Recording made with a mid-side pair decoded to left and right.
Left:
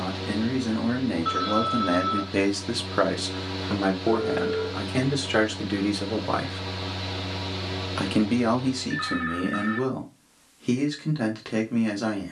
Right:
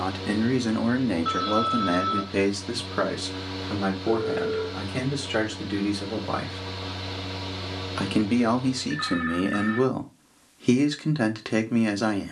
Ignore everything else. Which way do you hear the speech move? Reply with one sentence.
You can hear the speech go left and come back.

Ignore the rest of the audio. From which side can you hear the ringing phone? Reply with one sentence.
You can hear the ringing phone in the centre.